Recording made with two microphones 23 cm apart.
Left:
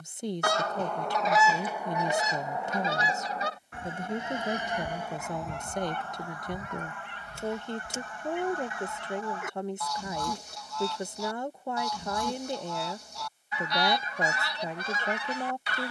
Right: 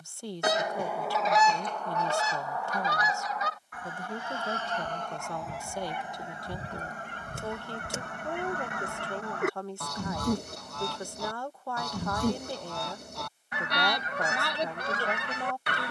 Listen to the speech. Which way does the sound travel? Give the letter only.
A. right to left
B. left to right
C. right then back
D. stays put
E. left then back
D.